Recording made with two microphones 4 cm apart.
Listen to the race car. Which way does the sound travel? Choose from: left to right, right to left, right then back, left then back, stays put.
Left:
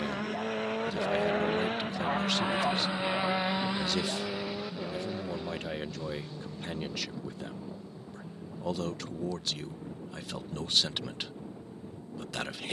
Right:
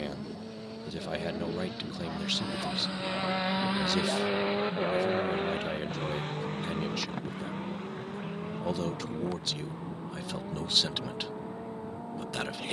left to right.